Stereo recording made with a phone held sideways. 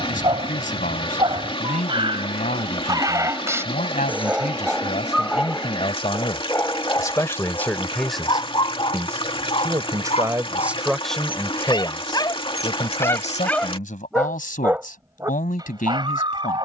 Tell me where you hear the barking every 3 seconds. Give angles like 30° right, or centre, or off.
30° right, 10° right, 20° left, 40° left, 10° left, 30° right.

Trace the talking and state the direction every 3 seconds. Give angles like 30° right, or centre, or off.
60° left, 50° left, 10° left, 10° right, 50° left, 60° left.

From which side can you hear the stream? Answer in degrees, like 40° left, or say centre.
30° left.